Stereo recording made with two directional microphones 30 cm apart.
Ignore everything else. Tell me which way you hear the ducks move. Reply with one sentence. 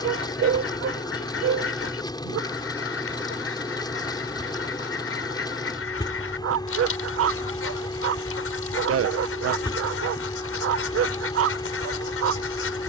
You can hear the ducks stay in one place.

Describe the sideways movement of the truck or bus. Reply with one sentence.
In this clip you hear the truck or bus stay in one place.